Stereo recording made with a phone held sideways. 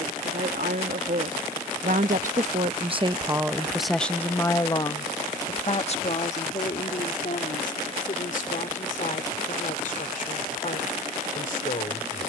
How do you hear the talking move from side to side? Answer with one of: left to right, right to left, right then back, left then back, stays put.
right to left.